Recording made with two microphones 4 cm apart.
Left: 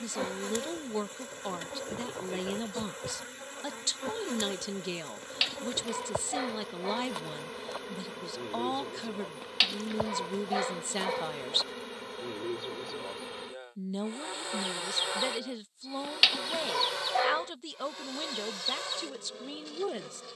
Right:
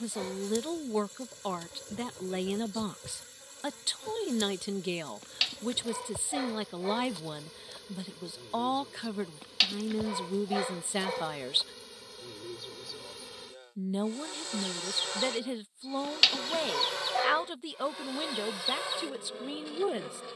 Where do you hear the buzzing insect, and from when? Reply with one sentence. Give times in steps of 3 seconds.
In this clip you hear the buzzing insect on the left from 0 s and in the centre from 15 s.